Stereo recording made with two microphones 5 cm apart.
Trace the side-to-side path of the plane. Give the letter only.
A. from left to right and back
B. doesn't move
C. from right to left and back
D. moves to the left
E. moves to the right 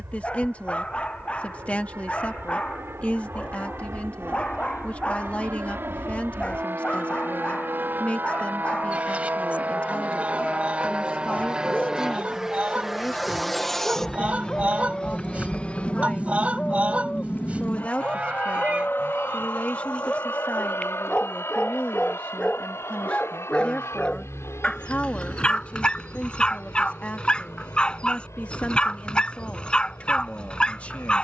D.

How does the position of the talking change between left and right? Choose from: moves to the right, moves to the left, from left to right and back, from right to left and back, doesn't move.
doesn't move.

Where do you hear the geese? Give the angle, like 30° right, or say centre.
30° right.